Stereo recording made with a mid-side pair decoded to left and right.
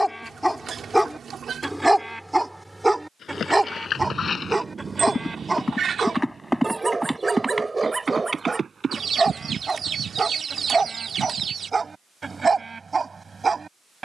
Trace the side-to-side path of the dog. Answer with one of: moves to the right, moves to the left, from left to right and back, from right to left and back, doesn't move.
moves to the right.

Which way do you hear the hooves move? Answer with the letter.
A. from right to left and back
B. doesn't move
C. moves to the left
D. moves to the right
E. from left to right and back
D.